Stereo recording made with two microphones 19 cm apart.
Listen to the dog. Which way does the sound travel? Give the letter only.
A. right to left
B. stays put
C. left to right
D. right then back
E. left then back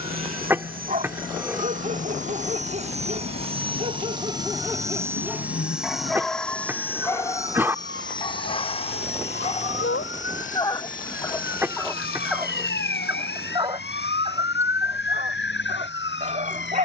E.